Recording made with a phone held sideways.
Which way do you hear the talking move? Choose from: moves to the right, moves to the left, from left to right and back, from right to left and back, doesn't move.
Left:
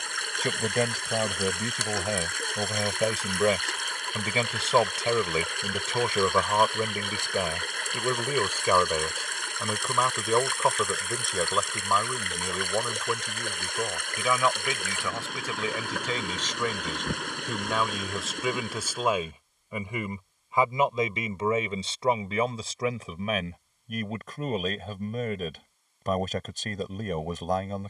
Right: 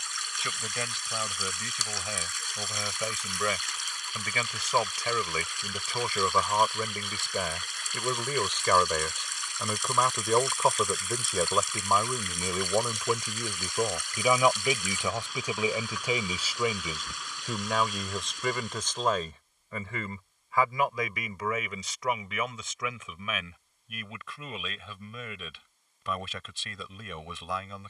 from left to right and back.